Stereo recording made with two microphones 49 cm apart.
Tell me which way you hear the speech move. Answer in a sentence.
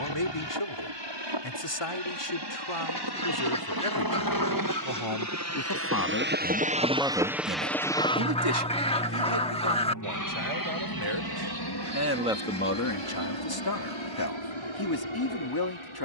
You can hear the speech move from left to right and back again.